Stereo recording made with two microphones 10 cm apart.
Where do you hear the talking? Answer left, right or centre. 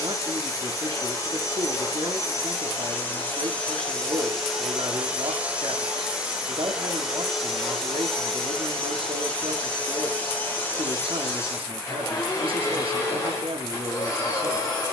right.